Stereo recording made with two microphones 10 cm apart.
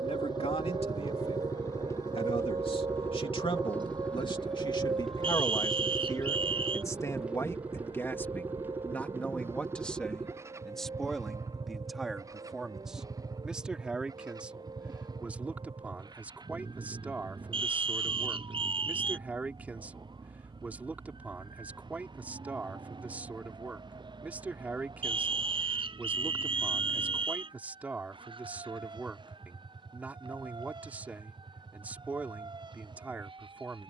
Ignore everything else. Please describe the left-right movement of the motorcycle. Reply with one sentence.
You can hear the motorcycle move to the right.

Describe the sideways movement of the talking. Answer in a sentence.
You can hear the talking travel towards the right.